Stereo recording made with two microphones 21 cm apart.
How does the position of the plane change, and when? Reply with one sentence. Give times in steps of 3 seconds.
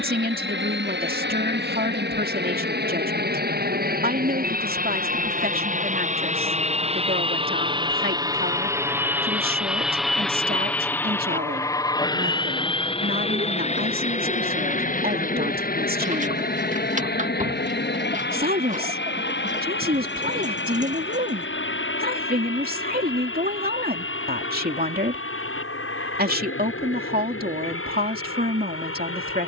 In this clip you hear the plane on the right from 0 s, in the centre from 9 s and on the left from 12 s.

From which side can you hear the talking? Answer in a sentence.
In this clip you hear the talking on the right.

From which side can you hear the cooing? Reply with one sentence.
You can hear the cooing on the right.